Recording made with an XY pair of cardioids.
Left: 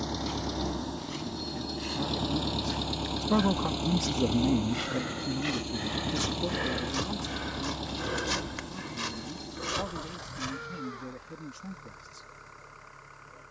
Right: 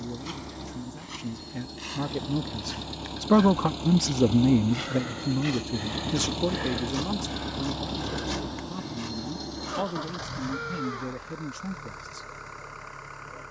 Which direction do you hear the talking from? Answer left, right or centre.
right.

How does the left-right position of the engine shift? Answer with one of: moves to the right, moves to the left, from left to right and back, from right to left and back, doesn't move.
moves to the right.